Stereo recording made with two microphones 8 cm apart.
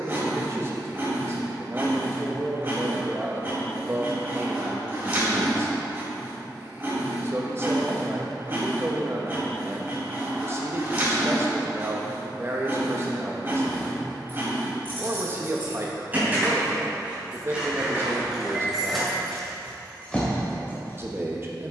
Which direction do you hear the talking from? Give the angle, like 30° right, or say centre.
30° right.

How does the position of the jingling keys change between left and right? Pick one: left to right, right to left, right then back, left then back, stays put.
right to left.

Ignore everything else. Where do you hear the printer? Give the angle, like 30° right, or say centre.
30° right.